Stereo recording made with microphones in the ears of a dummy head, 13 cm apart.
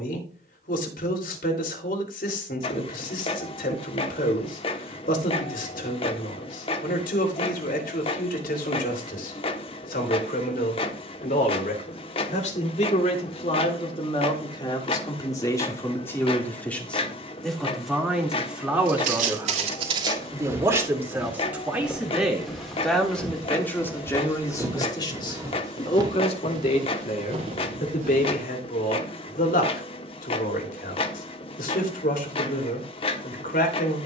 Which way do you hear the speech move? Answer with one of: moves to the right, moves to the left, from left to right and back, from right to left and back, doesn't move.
from left to right and back.